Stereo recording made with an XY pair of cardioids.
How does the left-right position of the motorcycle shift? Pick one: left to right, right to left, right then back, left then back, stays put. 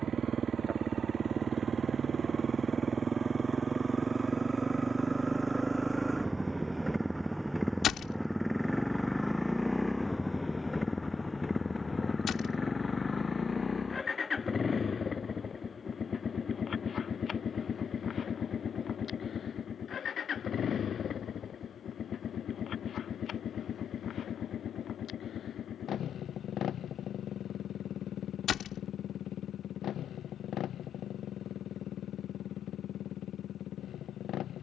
right to left.